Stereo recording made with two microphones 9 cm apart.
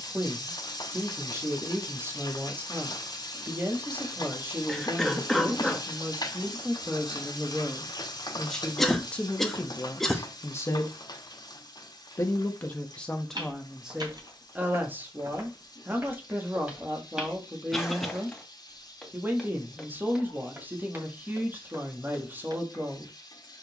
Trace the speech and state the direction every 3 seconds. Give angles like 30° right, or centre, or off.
20° right, 20° right, centre, 20° left, centre, 20° right, 20° right, 20° right.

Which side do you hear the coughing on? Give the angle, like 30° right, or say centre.
centre.